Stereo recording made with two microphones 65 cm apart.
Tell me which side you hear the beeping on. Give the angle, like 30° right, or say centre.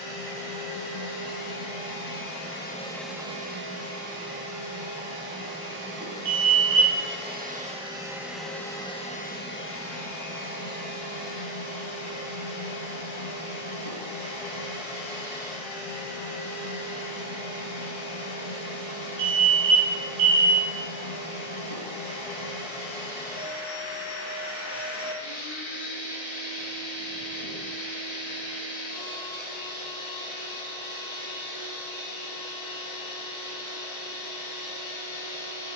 70° right.